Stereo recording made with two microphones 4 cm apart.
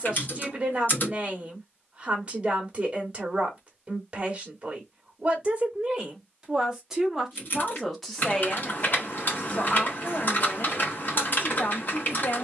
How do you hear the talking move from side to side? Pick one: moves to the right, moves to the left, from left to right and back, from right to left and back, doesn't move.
moves to the left.